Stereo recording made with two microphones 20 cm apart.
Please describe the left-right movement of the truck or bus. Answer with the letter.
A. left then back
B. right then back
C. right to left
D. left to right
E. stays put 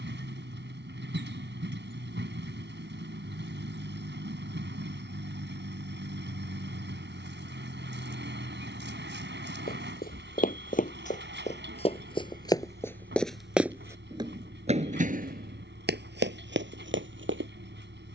E.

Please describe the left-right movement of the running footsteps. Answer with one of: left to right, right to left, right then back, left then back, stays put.
left to right.